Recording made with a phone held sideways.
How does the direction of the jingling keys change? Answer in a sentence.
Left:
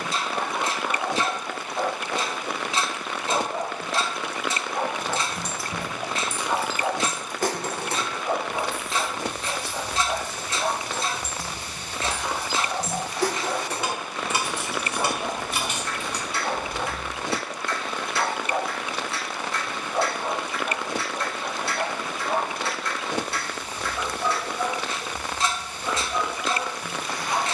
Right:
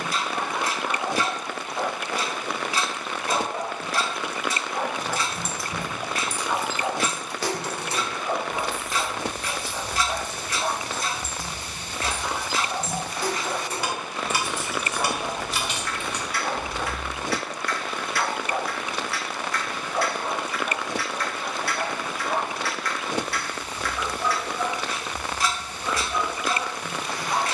You can hear the jingling keys go left and come back.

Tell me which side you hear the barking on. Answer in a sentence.
You can hear the barking in the centre.